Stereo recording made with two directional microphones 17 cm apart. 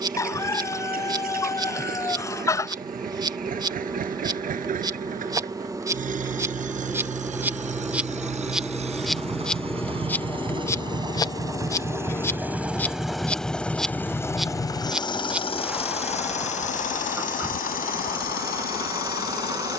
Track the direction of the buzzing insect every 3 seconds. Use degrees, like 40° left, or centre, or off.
20° right, 20° right, 10° right, 10° left, centre, 10° right, 20° right.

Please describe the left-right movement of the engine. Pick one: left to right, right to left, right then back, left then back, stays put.
right to left.